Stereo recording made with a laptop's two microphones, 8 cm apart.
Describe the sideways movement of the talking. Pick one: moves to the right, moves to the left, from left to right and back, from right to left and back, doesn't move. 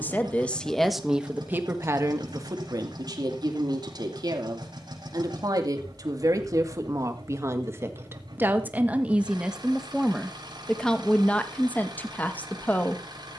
from left to right and back.